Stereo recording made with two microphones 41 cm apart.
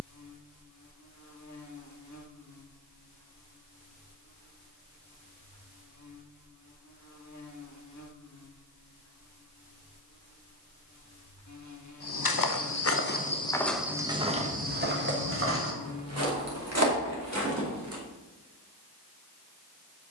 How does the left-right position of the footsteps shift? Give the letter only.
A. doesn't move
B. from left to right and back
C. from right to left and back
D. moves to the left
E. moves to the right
E.